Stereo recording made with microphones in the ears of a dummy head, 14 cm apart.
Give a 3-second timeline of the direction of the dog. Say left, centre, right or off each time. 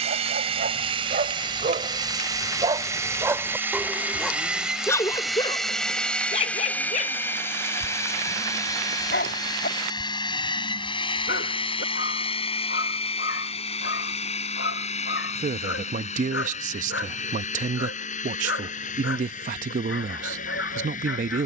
right, centre, left, left, left, left, left.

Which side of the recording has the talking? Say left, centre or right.
right.